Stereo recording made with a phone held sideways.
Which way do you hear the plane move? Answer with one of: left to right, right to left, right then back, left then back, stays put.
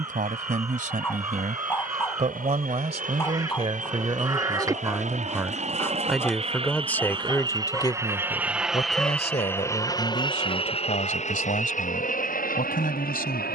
right to left.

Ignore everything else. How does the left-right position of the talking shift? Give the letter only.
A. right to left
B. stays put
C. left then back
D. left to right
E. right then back
A.